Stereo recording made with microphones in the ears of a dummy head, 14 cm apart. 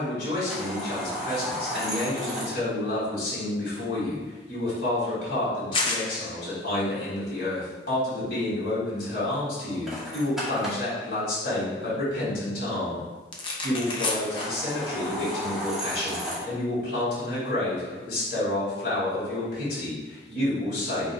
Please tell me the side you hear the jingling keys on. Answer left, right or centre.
centre.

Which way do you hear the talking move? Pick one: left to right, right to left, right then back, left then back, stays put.
stays put.